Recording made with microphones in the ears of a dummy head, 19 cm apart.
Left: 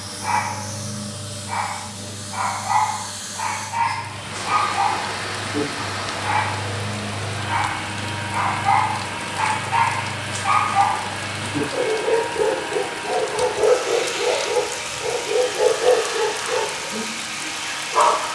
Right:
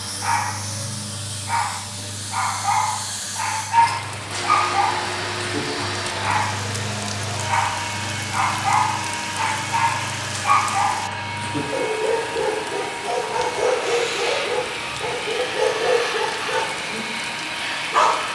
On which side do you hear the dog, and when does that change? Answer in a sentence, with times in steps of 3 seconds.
You can hear the dog on the right from 0 s, in the centre from 9 s and on the right from 12 s.